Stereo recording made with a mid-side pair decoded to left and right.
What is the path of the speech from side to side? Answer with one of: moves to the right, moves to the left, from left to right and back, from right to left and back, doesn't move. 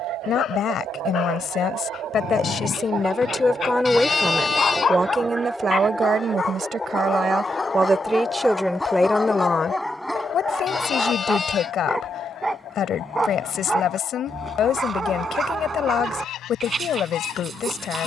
from left to right and back.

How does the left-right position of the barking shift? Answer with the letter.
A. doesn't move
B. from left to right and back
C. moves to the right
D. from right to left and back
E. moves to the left
C.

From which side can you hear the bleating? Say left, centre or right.
left.